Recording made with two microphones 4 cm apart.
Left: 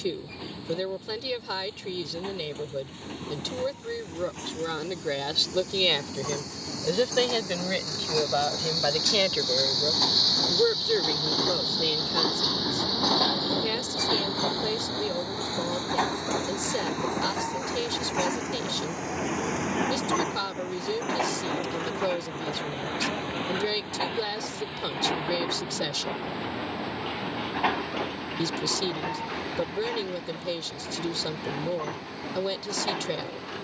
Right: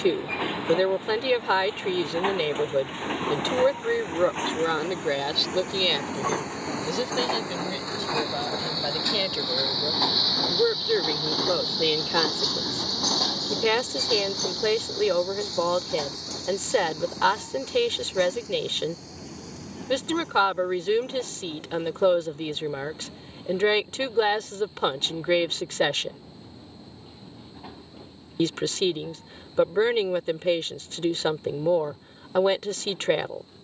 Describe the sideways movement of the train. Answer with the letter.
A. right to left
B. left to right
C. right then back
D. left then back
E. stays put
A.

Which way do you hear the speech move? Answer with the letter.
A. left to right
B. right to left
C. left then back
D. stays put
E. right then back
C.